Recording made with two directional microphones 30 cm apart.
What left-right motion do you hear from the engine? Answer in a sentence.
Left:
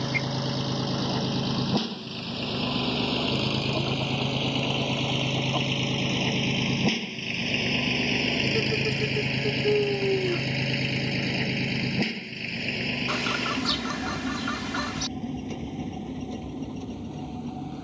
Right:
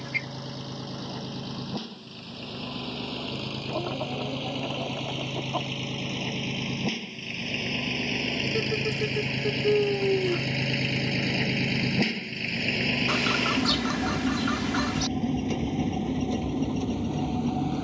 You can hear the engine move from left to right.